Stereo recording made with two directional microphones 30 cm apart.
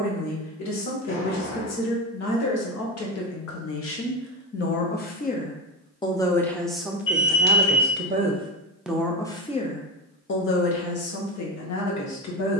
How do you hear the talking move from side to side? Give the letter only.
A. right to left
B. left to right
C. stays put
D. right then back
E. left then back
D.